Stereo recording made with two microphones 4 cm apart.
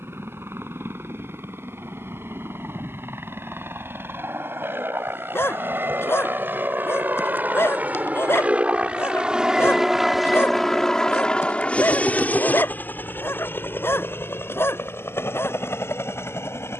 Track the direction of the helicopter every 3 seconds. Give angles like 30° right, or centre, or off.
70° right, 60° right, 40° right, centre, 50° left, 70° left.